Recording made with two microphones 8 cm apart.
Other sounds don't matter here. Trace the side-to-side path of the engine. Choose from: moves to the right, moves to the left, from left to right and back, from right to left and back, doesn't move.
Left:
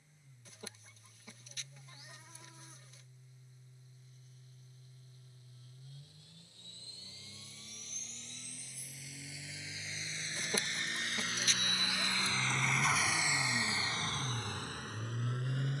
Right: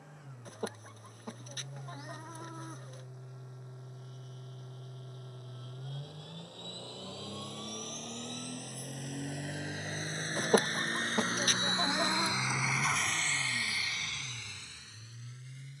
moves to the left.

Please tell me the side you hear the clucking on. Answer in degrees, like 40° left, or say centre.
50° right.